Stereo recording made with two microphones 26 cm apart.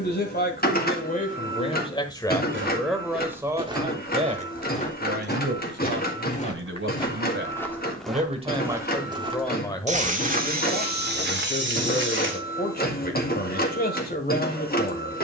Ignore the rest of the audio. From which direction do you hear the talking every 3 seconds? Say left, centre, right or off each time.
left, right, right, left, left.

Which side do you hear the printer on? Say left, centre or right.
left.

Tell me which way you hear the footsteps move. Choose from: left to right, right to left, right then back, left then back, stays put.
left then back.